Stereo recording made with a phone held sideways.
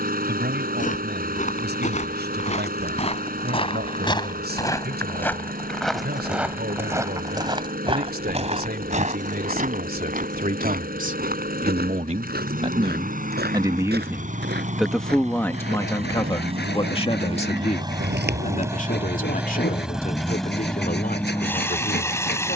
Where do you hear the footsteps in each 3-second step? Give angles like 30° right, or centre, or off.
50° left, 20° left, 20° right, 60° right, 70° right, 80° right, 80° right, off.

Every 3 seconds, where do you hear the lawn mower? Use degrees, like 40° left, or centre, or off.
60° right, 60° right, 60° right, 60° right, 50° right, 40° right, 10° right, 10° left.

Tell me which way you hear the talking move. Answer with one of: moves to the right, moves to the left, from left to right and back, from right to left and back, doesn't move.
moves to the left.